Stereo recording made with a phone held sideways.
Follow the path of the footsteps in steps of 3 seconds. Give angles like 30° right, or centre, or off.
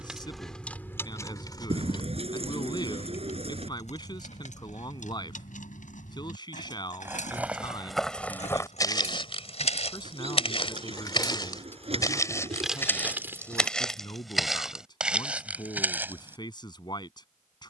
off, off, centre, 40° left, 10° left, 10° right.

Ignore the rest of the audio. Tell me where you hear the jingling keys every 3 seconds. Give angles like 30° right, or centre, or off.
20° left, 60° left, 60° left, 30° left, 10° right, off.